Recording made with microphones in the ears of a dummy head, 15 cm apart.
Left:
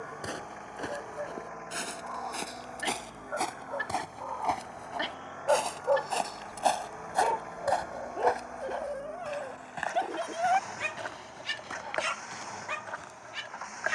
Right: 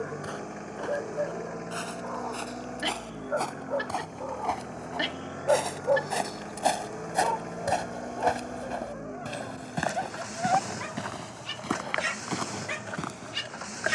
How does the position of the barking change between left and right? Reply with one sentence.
You can hear the barking go left and come back.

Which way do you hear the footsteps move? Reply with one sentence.
In this clip you hear the footsteps go from the left side to the right.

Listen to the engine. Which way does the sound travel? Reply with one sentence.
In this clip you hear the engine stay put.